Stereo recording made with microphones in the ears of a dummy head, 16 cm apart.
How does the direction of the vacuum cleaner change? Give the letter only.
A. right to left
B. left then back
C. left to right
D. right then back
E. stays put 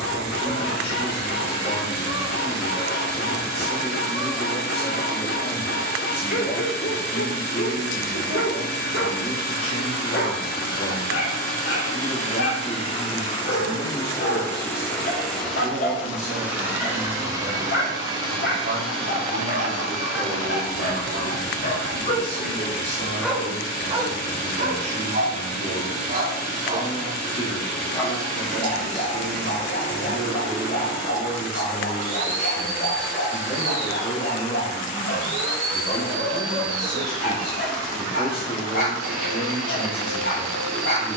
C.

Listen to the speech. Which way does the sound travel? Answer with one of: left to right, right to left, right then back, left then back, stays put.
right then back.